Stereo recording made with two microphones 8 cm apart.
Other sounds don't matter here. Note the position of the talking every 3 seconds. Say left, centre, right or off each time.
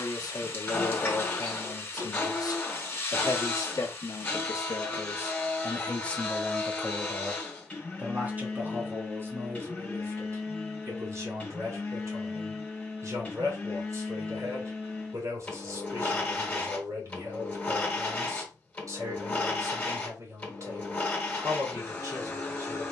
left, left, centre, right, right, right, right, right.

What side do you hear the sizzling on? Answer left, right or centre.
left.